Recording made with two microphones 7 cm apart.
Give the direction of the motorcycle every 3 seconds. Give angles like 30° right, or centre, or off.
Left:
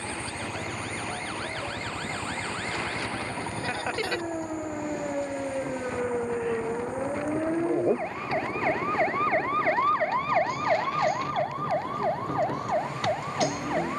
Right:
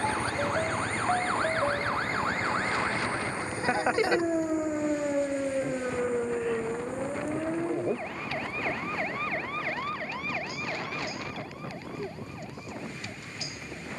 10° left, 40° left, 50° left, 60° left, 60° left.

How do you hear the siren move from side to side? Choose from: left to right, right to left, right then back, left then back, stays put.
right to left.